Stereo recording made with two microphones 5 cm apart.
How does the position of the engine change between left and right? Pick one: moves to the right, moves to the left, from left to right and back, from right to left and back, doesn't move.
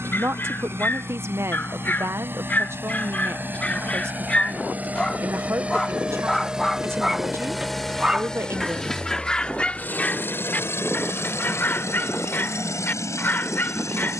moves to the left.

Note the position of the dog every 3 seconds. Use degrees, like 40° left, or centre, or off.
40° left, 20° left, centre, 30° left, 40° left.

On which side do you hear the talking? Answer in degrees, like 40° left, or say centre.
50° right.